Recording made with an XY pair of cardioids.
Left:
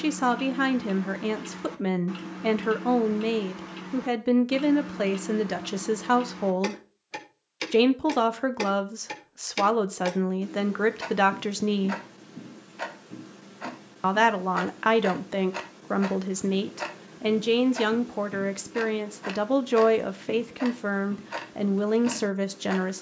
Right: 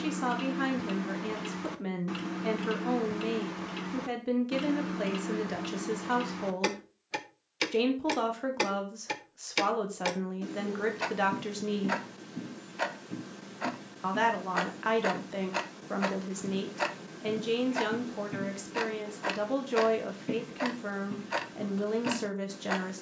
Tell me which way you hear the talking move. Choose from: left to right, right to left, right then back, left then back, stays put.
stays put.